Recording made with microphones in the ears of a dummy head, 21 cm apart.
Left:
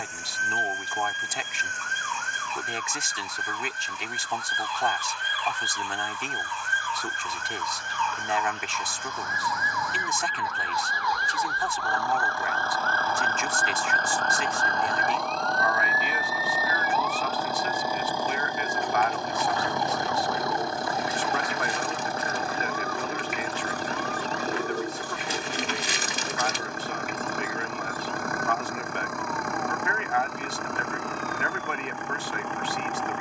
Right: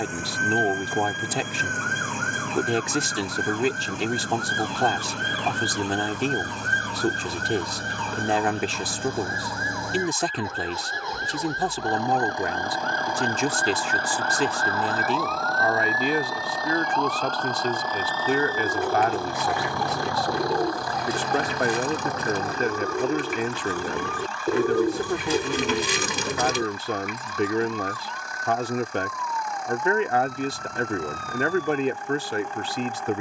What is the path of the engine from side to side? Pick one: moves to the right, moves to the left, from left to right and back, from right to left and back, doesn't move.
moves to the left.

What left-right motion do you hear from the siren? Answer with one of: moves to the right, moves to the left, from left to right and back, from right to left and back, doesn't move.
moves to the right.